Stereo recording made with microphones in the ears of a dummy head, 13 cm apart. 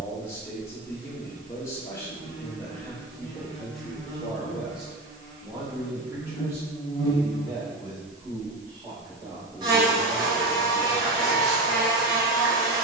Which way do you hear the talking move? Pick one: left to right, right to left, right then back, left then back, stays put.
left to right.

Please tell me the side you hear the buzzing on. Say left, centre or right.
right.